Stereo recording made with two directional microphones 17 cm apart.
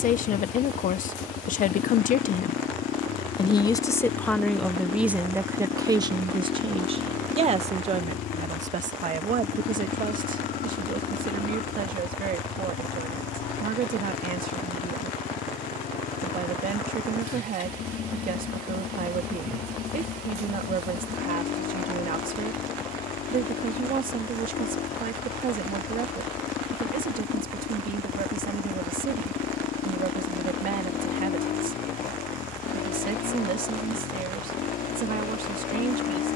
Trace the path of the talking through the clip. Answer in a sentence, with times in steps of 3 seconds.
You can hear the talking on the left from 0 s, in the centre from 3 s and on the right from 6 s.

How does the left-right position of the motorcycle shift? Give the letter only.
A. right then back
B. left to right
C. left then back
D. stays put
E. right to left
D.